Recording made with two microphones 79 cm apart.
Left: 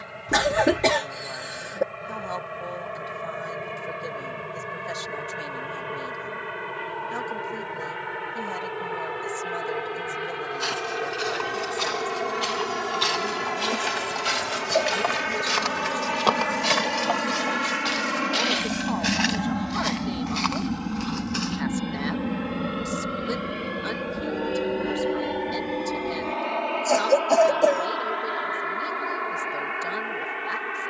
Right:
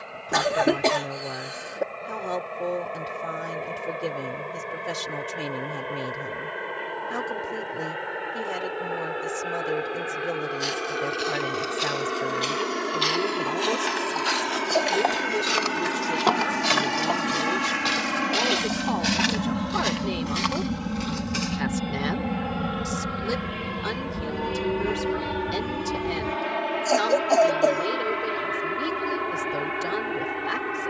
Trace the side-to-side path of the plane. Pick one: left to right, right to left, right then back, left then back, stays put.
left to right.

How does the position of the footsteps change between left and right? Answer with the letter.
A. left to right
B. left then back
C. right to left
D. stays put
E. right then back
A.